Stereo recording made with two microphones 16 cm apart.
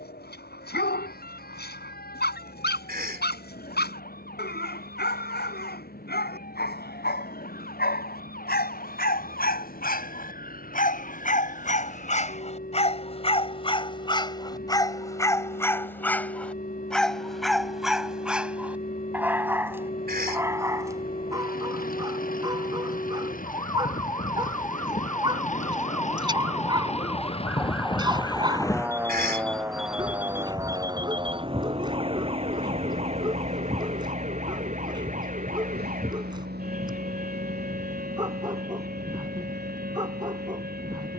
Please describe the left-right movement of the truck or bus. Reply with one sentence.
In this clip you hear the truck or bus move from left to right.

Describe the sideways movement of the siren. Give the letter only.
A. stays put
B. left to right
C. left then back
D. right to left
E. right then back
B.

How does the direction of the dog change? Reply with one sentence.
In this clip you hear the dog move from left to right.